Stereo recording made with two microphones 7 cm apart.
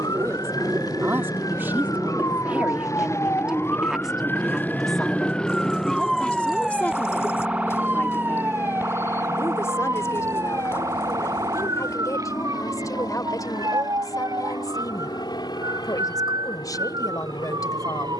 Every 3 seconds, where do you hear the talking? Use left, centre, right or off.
right, centre, left, left, left, left.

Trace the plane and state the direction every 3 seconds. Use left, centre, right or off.
right, centre, left, left, left, left.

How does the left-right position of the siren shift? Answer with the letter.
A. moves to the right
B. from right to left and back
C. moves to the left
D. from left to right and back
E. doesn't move
A.